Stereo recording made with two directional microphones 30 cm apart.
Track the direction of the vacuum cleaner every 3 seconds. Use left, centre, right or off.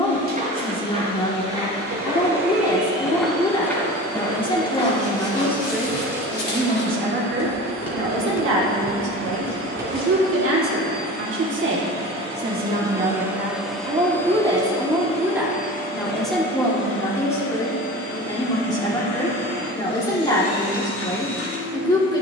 right, right, right, right, centre, left, left, left.